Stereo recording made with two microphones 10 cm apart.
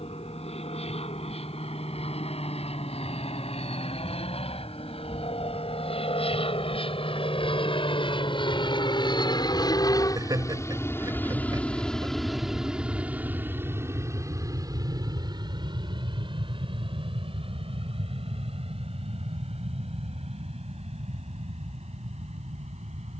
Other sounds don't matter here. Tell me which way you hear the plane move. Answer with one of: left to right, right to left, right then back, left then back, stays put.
left to right.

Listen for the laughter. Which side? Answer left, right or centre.
right.